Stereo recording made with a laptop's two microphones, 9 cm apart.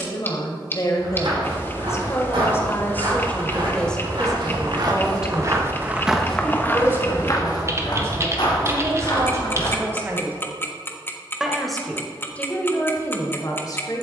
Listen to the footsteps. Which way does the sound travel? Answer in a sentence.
You can hear the footsteps move from right to left.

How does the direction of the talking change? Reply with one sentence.
You can hear the talking move from left to right and back again.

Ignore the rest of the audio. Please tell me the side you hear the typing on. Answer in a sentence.
You can hear the typing on the right.